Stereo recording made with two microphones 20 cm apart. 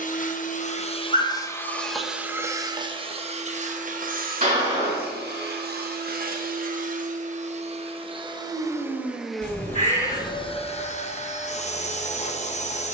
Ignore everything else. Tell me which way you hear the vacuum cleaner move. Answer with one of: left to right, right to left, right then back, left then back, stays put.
right then back.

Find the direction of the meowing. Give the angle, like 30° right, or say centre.
40° right.